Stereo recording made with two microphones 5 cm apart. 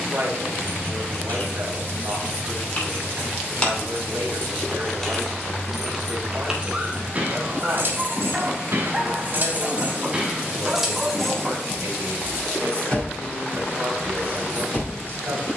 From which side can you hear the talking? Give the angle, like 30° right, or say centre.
60° right.